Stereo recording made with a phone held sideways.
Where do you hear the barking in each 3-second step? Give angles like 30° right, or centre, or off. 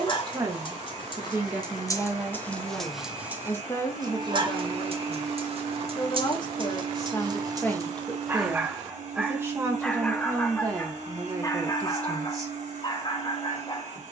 30° left, 40° right, 30° right, 10° left, 40° left.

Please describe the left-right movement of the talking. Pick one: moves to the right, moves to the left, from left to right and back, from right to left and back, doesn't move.
from right to left and back.